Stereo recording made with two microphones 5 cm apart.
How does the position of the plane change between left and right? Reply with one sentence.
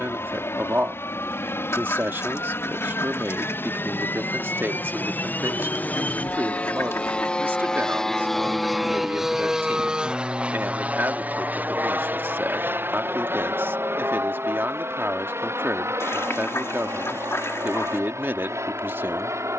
In this clip you hear the plane move from left to right.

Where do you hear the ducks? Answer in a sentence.
In this clip you hear the ducks on the left.